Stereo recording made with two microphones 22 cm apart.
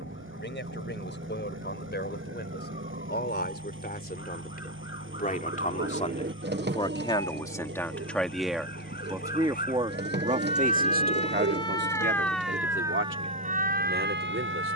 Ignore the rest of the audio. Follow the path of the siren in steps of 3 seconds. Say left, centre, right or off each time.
left, left, left, left, right.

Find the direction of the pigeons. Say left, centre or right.
right.